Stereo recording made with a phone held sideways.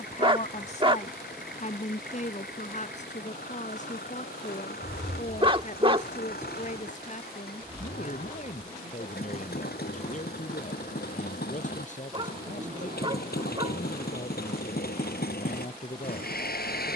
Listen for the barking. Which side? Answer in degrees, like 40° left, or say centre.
30° right.